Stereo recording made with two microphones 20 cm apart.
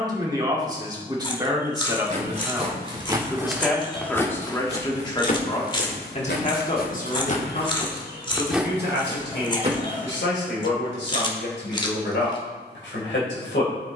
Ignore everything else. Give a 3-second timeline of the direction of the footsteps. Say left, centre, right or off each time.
right, left, left, right, off.